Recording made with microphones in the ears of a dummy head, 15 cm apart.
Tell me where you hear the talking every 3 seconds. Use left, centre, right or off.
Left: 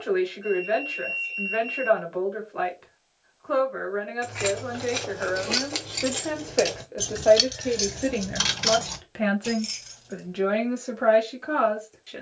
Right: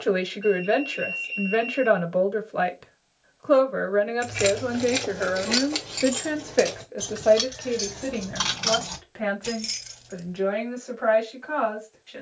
right, right, centre, left.